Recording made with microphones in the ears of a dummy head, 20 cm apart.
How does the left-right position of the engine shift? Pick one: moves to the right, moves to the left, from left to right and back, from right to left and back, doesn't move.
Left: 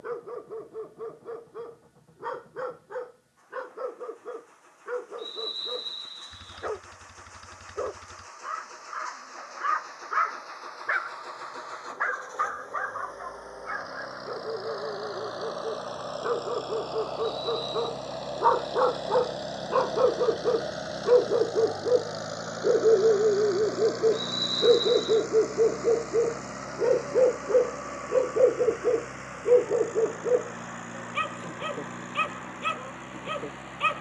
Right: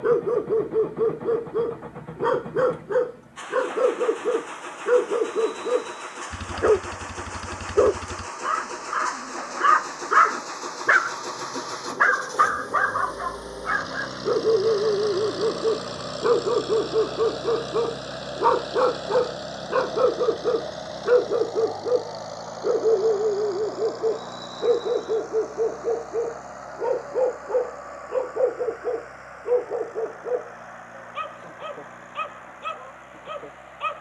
moves to the left.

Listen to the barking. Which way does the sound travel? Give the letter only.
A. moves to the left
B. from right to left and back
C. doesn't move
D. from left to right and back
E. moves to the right
A.